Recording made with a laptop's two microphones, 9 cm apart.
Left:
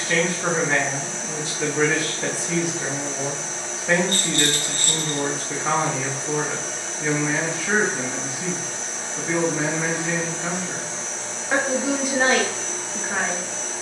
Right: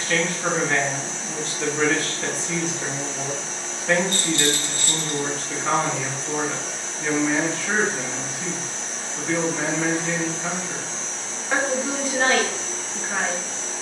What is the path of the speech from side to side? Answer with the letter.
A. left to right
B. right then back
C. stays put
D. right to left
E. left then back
C.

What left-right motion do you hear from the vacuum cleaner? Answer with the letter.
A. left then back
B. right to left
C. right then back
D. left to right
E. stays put
E.